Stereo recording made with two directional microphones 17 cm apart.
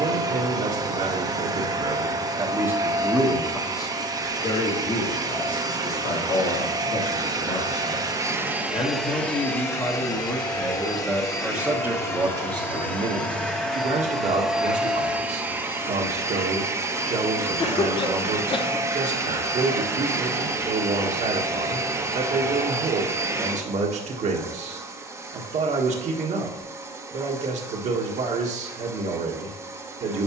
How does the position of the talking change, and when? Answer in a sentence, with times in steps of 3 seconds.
In this clip you hear the talking on the right from 0 s, on the left from 3 s, in the centre from 9 s and on the right from 12 s.